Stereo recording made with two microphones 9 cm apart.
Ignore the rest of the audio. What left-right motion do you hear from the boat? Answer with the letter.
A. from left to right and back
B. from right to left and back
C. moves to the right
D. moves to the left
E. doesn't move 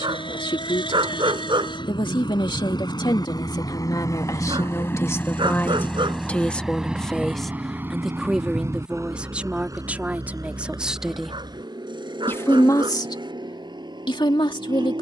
C.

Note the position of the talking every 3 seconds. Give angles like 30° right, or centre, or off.
70° left, 40° left, centre, 10° right, 50° left.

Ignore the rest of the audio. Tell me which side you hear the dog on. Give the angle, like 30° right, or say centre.
70° right.